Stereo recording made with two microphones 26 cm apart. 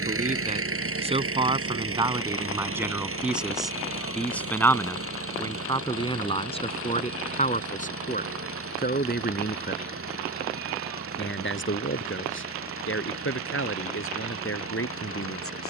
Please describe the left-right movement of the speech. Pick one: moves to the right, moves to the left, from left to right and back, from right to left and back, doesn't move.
moves to the left.